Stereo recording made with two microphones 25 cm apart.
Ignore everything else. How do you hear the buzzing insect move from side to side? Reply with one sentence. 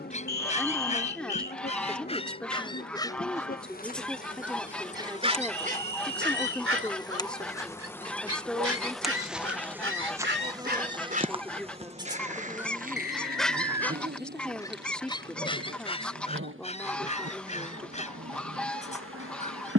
You can hear the buzzing insect travel towards the right.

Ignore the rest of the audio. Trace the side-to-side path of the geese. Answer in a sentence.
You can hear the geese stay in one place.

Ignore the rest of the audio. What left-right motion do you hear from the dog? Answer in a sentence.
You can hear the dog move from left to right and back again.